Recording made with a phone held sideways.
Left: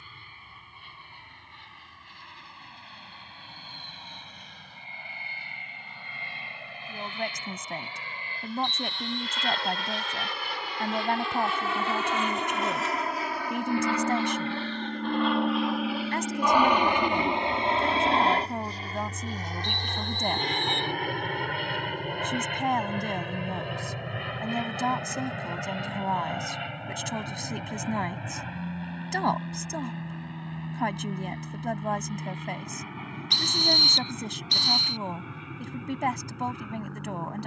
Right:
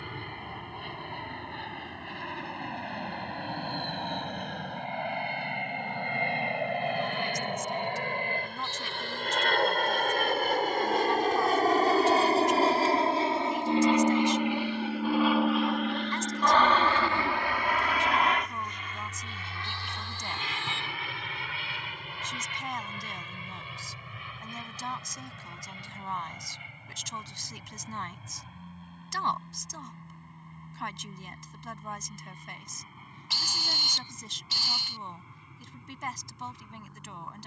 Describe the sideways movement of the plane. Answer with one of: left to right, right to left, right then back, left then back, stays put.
right to left.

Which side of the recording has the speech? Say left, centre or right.
left.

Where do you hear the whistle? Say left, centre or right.
centre.